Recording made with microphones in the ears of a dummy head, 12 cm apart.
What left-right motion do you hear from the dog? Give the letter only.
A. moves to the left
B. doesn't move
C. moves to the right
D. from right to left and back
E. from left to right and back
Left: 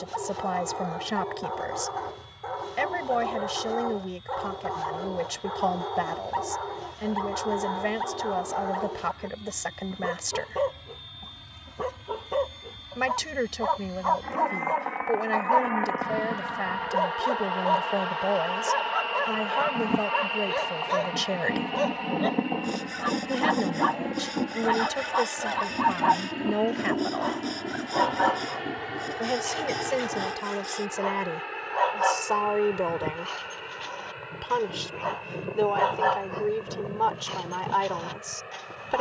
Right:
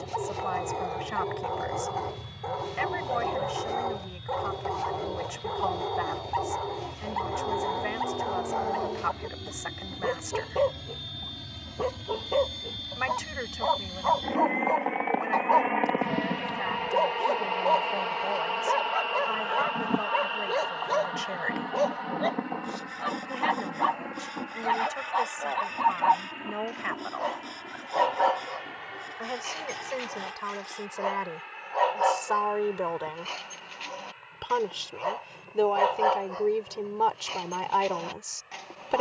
B.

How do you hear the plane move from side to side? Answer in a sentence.
You can hear the plane go from the right side to the left.